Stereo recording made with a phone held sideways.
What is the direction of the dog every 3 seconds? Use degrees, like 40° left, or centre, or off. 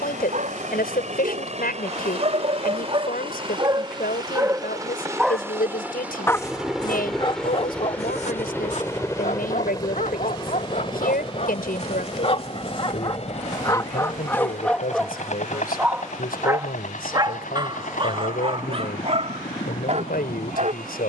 50° right, 20° right, 40° left, 50° left, 30° left, 20° right, 40° right.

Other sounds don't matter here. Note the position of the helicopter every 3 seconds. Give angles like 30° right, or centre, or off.
50° right, 20° right, 10° left, 30° left, 40° left, 50° left, 60° left.